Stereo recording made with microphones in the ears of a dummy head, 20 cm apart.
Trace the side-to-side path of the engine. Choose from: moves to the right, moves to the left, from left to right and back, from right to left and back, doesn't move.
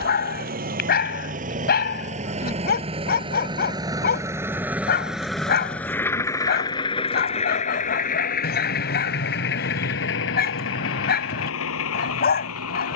moves to the left.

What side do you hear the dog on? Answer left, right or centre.
left.